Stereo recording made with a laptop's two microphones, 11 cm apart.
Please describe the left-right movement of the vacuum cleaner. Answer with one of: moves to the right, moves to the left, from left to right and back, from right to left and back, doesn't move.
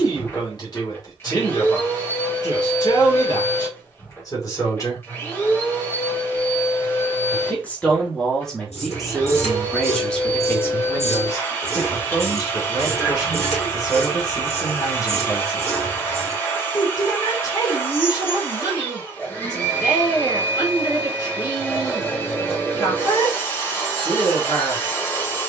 doesn't move.